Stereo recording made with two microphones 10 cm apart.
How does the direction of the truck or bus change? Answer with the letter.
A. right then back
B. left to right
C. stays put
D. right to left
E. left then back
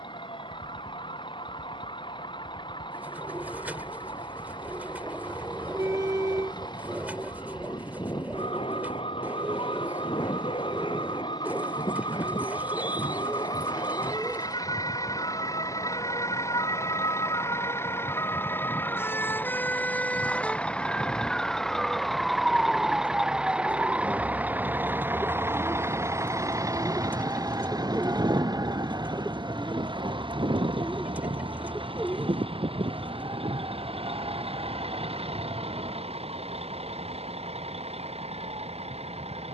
B.